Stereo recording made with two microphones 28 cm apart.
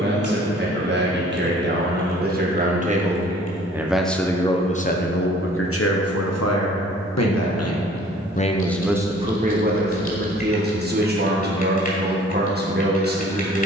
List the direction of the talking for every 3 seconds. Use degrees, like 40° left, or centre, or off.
40° right, 20° left, 50° left, 30° right, 40° right.